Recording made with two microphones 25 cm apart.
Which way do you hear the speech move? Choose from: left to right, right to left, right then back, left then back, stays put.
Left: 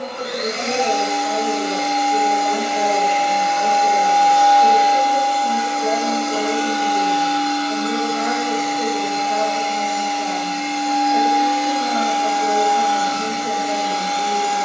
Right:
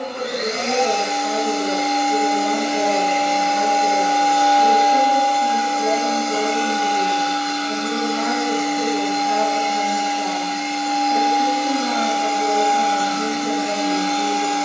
stays put.